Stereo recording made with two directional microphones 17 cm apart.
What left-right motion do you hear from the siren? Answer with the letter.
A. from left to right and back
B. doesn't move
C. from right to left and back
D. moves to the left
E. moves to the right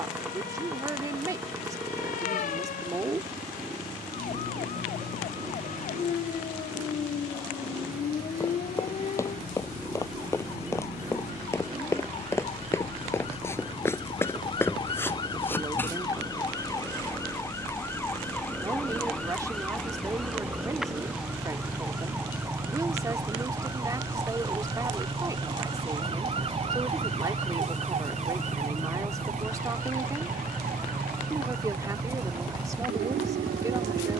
E.